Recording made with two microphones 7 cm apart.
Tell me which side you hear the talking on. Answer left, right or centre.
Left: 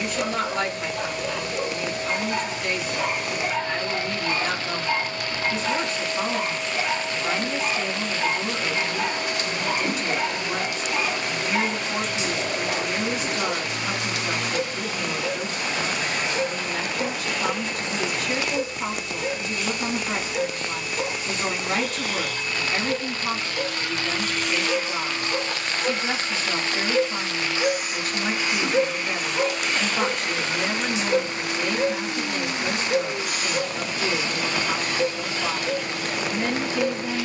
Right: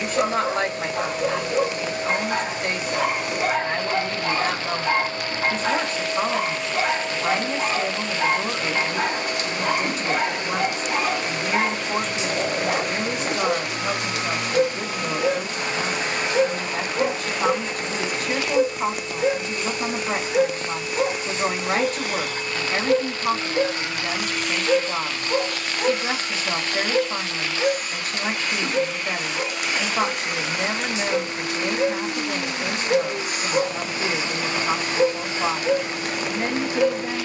right.